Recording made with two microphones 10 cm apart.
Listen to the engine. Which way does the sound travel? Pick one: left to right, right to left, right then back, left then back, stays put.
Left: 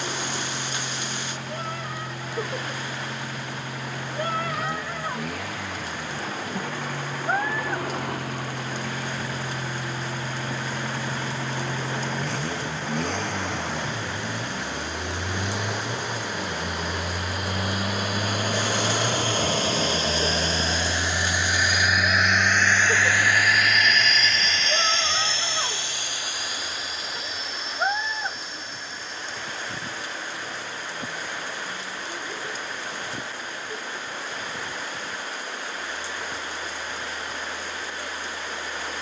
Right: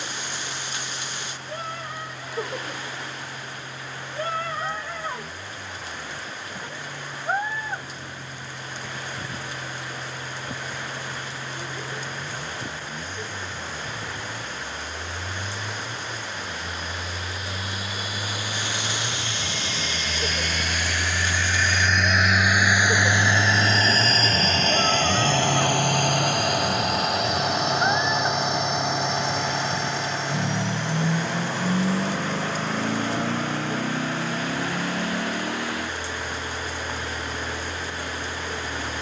left to right.